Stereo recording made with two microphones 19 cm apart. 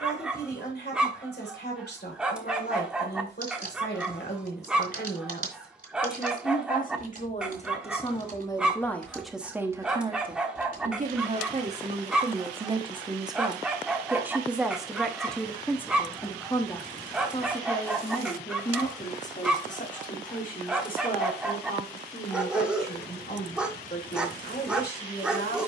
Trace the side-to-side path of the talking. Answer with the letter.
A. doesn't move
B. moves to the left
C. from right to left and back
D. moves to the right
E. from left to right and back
E.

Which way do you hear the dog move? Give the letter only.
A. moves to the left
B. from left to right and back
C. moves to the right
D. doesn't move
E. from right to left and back
D.